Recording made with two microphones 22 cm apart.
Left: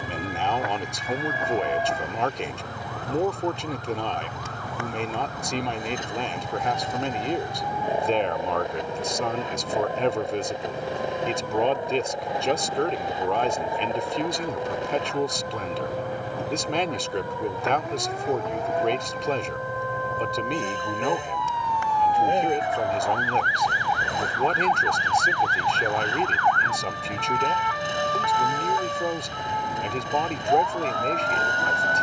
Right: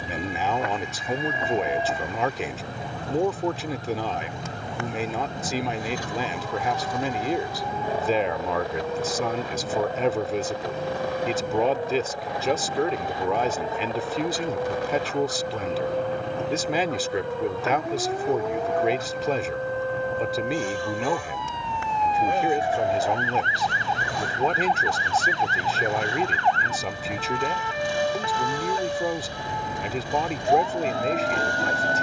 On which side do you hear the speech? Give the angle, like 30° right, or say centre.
centre.